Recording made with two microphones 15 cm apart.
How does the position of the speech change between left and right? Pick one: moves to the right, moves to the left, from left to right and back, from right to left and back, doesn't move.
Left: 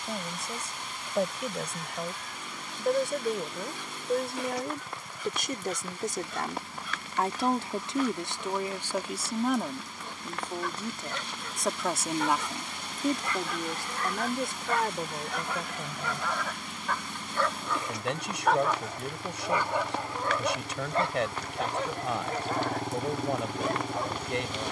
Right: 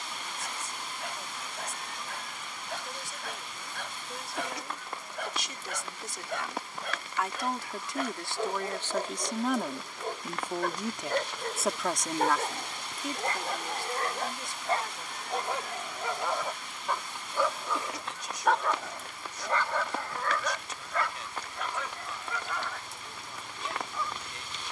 from left to right and back.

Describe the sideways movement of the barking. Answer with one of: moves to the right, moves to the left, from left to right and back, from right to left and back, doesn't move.
moves to the left.